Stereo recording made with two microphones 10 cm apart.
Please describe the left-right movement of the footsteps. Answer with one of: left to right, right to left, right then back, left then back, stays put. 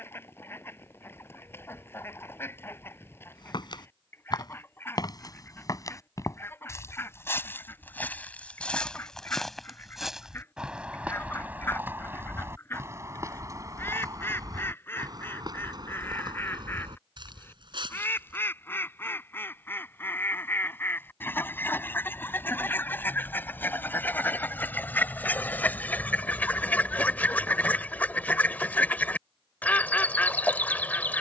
left to right.